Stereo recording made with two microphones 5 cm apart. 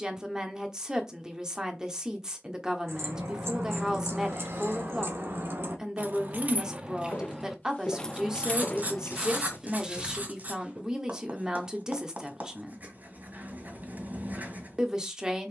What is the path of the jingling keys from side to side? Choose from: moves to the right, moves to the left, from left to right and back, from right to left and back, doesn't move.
moves to the left.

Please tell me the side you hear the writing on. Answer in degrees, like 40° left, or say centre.
40° right.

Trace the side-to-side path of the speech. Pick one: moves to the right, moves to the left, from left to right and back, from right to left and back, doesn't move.
doesn't move.